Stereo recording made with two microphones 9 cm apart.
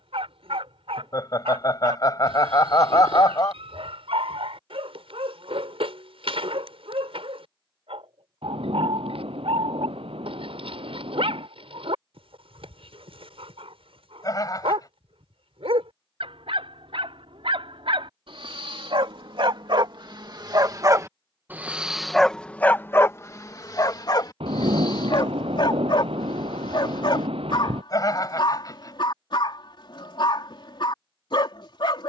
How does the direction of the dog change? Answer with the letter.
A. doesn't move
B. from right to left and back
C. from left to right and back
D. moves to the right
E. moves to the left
E.